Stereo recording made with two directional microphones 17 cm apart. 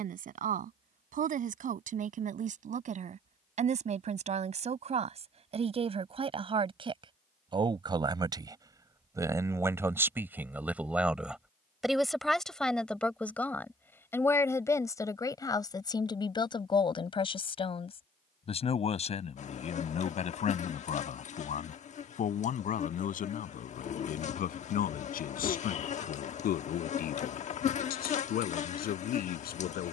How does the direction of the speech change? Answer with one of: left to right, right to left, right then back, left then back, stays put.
right to left.